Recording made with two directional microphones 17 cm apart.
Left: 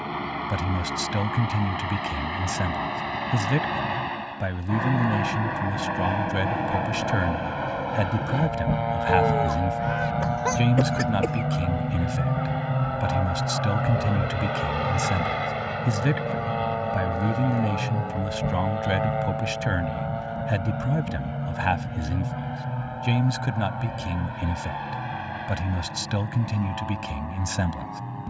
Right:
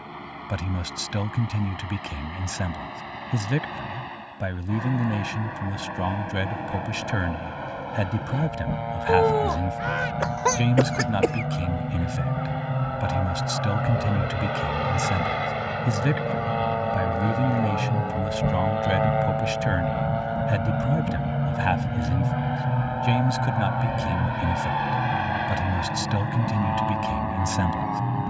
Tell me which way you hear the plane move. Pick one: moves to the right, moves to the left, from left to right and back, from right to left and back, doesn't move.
moves to the right.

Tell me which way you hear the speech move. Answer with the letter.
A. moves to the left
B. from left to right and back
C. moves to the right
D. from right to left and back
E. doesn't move
E.